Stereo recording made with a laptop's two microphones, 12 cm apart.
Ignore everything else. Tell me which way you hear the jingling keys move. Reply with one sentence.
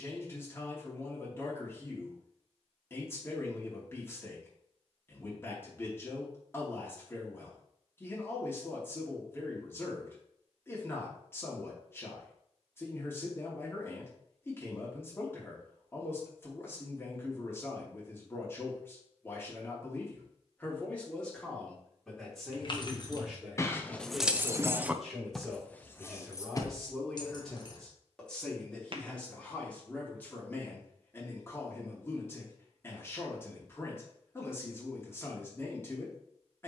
In this clip you hear the jingling keys go right and come back.